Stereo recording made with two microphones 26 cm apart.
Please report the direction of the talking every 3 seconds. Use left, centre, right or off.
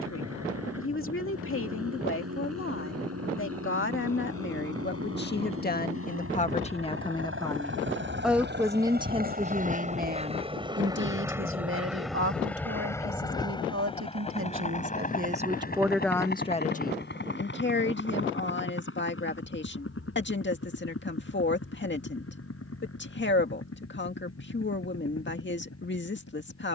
left, left, centre, right, right, centre, left, left, left.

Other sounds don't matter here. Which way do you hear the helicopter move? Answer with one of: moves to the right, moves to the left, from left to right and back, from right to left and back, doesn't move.
moves to the left.